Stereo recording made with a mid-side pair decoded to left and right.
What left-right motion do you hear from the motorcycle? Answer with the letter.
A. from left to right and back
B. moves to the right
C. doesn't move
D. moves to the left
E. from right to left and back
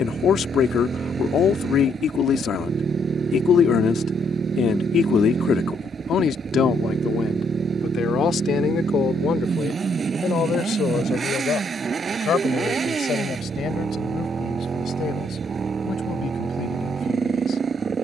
C.